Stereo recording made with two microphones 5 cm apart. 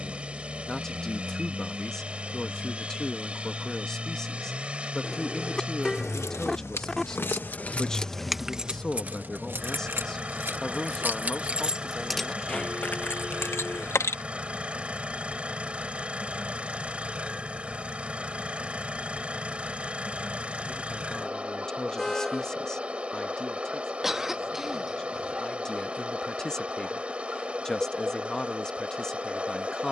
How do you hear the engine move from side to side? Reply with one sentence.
In this clip you hear the engine stay put.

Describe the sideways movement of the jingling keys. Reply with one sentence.
You can hear the jingling keys move from left to right and back again.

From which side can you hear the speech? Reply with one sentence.
You can hear the speech in the centre.